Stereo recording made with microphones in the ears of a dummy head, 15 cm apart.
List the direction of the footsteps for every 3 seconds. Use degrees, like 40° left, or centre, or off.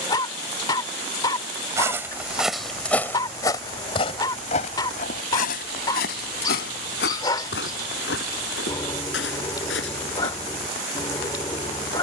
centre, 40° left, 70° left, 80° left.